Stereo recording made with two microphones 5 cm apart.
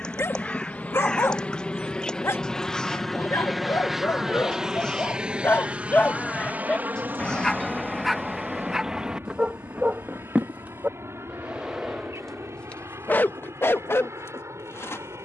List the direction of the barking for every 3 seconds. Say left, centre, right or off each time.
left, left, centre, right, left.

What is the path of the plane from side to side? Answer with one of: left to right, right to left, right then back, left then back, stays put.
left to right.